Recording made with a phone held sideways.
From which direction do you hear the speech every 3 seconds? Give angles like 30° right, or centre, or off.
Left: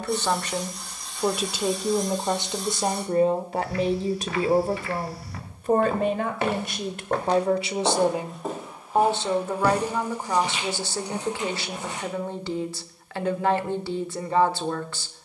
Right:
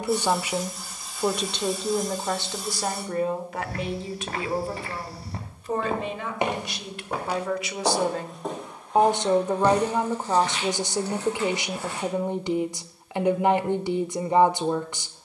10° left, 40° left, 40° left, 20° right, 20° right.